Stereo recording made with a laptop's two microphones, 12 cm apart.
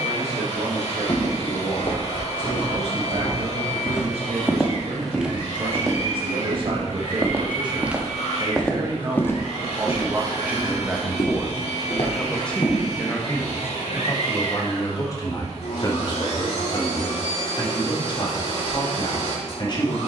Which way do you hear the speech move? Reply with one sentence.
You can hear the speech go from the right side to the left.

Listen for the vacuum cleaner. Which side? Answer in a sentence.
You can hear the vacuum cleaner on the left.